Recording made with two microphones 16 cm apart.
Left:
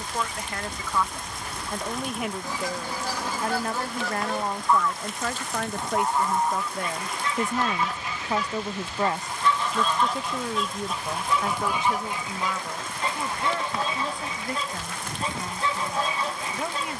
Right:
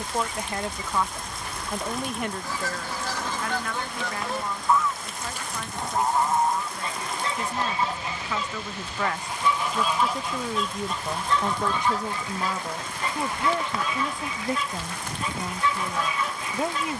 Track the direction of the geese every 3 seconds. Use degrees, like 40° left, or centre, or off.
20° left, centre, 30° right, centre, 30° left, 30° left.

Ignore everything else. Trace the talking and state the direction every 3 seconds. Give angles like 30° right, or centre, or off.
10° right, 50° left, 50° left, centre, 20° right, 20° right.